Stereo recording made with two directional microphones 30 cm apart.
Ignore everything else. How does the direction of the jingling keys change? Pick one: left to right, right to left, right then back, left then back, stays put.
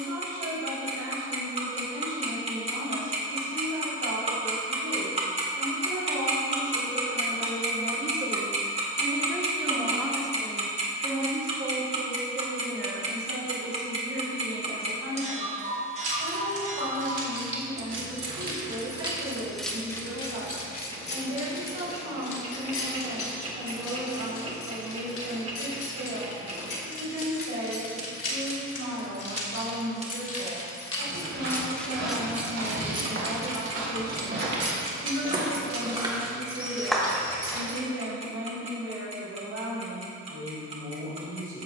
left then back.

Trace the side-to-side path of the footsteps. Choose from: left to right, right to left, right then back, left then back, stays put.
right to left.